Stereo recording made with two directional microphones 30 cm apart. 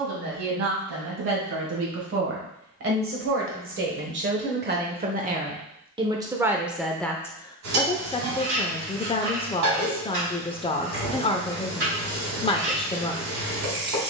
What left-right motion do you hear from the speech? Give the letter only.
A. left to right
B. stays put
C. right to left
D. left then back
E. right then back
C.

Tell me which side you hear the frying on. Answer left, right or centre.
right.